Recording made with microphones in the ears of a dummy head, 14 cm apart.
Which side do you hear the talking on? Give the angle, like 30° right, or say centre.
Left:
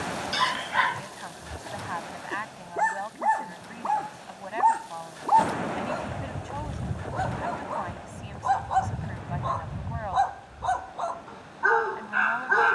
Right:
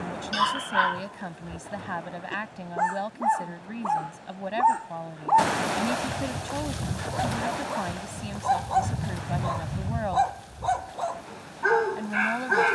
40° right.